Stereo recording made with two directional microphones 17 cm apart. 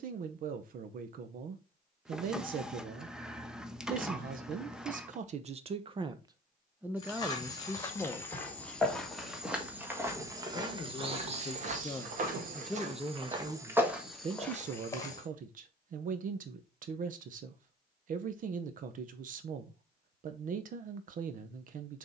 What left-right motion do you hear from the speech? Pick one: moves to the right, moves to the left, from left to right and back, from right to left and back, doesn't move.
from right to left and back.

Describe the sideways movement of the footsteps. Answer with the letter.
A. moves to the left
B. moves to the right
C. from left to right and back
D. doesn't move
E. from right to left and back
C.